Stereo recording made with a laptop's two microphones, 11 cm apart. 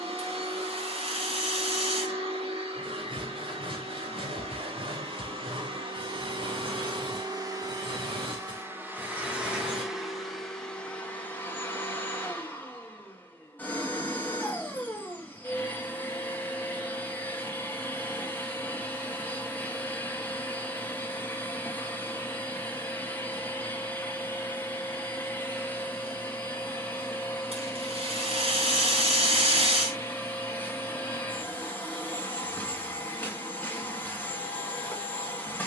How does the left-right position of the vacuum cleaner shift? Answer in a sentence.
You can hear the vacuum cleaner move to the left.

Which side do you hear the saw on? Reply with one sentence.
In this clip you hear the saw on the right.